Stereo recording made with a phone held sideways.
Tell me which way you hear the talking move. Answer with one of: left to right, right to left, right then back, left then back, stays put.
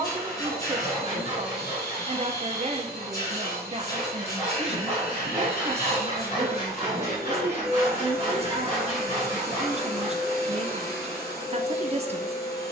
stays put.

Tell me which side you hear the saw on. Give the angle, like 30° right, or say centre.
50° left.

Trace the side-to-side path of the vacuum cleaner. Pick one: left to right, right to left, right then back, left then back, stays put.
stays put.